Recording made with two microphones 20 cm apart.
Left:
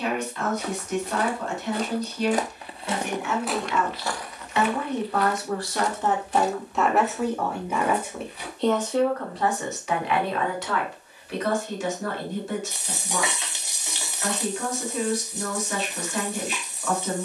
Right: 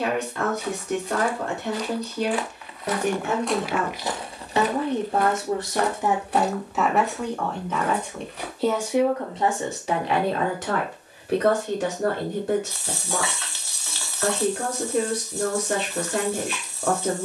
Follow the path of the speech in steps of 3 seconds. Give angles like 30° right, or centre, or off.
60° right, 40° right, centre, 40° right, 60° right, 60° right.